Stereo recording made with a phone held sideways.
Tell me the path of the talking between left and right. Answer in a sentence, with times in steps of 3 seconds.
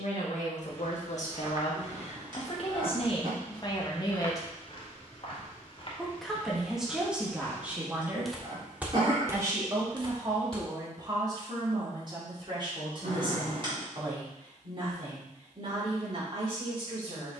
You can hear the talking on the left from 0 s, in the centre from 6 s and on the right from 9 s.